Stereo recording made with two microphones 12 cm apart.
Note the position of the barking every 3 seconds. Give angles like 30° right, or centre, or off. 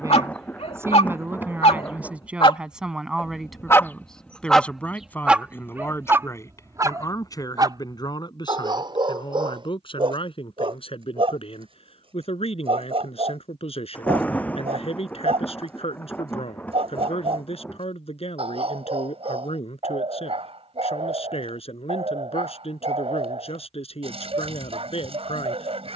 50° left, 10° left, 30° right, 40° right, 50° right, 50° right, 50° right, 50° right, 50° right.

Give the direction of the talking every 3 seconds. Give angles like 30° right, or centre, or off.
20° right, 10° left, 30° left, 50° left, 50° left, 50° left, 50° left, 50° left, 50° left.